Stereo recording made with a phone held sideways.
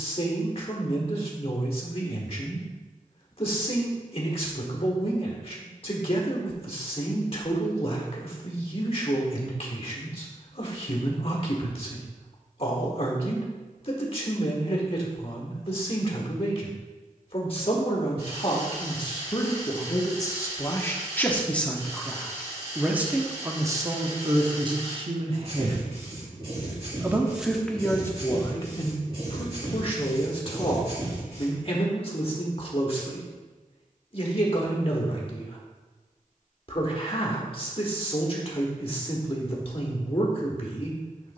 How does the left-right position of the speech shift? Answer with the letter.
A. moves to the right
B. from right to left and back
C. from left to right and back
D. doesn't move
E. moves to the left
C.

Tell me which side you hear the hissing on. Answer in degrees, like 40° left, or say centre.
40° right.